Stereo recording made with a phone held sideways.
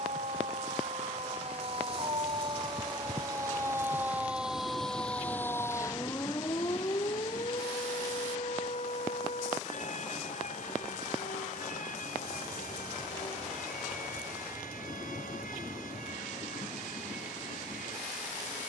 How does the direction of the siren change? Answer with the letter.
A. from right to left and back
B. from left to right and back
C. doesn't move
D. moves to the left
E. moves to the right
D.